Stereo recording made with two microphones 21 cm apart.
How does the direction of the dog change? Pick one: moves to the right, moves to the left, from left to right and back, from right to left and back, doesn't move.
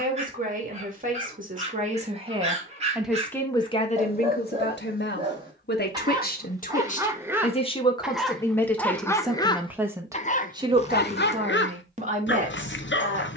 moves to the left.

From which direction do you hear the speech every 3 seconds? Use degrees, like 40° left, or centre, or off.
40° right, 40° left, 30° left, 20° right, 40° right.